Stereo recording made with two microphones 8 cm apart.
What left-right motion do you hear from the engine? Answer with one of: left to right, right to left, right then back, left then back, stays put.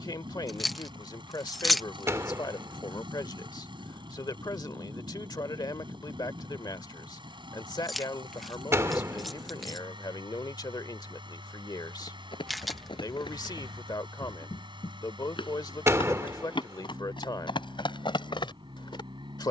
stays put.